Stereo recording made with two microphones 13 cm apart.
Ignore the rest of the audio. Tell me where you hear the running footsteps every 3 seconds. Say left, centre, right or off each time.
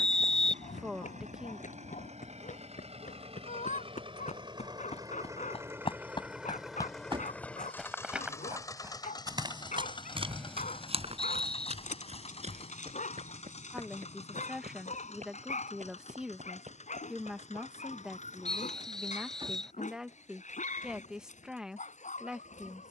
left, left, centre, right, right, right, off, off.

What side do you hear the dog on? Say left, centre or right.
left.